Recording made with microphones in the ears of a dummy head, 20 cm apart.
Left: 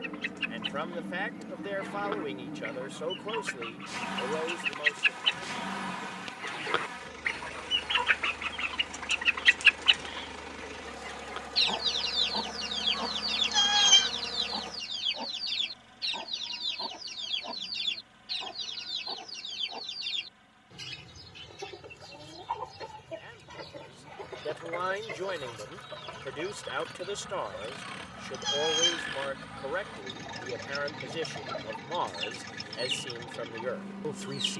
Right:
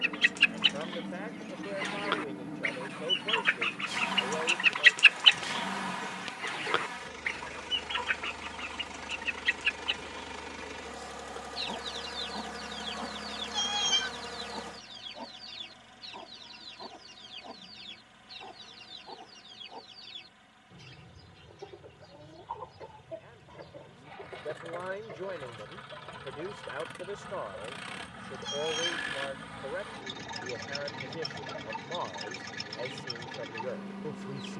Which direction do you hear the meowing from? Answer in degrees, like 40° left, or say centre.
30° left.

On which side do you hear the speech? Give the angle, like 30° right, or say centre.
70° left.